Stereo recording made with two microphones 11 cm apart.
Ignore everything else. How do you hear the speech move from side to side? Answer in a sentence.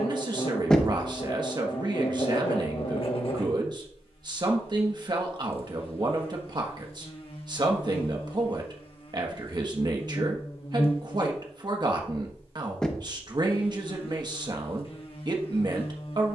You can hear the speech stay put.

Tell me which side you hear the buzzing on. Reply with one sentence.
You can hear the buzzing on the left.